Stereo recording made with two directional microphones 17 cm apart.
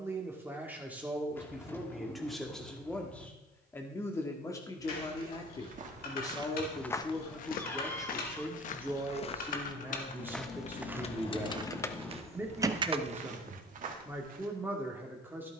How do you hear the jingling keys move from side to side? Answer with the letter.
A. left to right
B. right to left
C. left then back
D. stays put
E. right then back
A.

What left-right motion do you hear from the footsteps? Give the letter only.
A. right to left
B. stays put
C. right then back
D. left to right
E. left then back
E.